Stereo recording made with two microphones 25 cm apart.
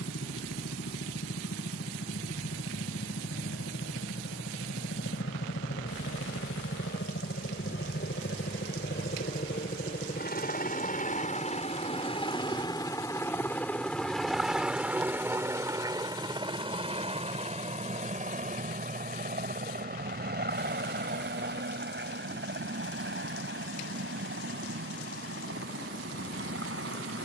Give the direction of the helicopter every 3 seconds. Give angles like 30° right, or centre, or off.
80° left, 70° left, 60° left, 40° left, 10° left, 20° right, 40° right, 50° right, 50° right.